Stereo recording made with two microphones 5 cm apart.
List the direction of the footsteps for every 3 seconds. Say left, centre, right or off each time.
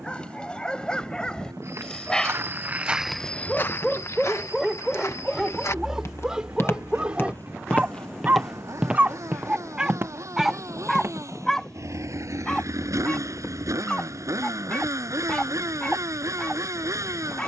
right, left, left, right, off, off.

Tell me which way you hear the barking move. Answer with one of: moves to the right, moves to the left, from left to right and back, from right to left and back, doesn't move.
from left to right and back.